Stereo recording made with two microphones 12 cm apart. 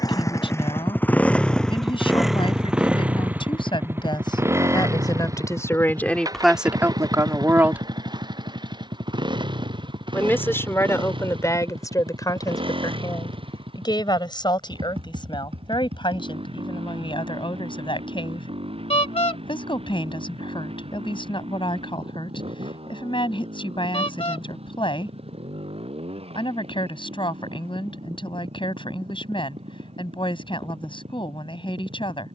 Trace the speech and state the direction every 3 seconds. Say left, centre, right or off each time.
left, left, centre, left, left, left, left, left, left, left, left.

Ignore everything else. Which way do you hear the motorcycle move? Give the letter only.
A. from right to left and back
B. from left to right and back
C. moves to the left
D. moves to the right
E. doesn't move
D.